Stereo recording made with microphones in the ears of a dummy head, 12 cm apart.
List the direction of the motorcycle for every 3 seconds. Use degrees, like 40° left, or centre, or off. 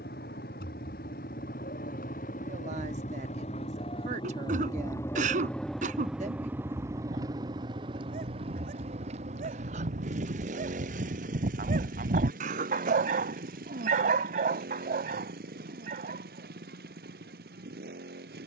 60° left, 30° left, 30° right, 50° right, 60° right, 70° right.